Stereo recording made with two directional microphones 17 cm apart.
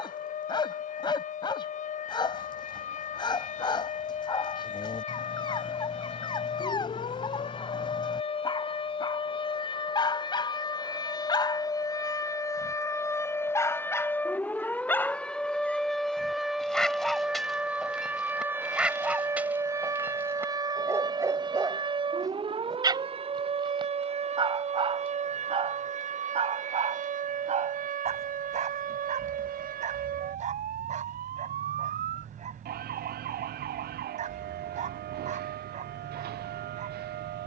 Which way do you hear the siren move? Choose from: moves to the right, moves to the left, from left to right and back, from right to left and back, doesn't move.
moves to the right.